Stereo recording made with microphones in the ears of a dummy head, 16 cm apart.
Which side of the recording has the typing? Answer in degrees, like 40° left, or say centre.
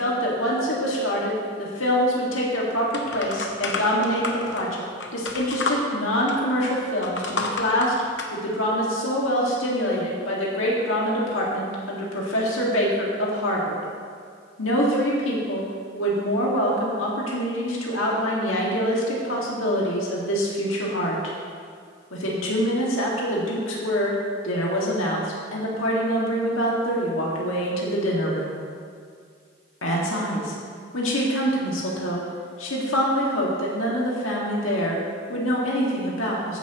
60° left.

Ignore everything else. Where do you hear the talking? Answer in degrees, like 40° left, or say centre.
70° left.